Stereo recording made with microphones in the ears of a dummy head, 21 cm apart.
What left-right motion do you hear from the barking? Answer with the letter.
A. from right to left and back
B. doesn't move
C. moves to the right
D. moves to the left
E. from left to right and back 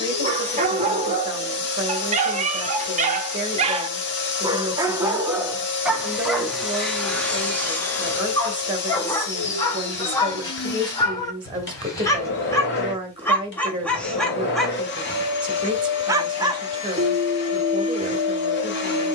A.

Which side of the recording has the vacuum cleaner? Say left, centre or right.
left.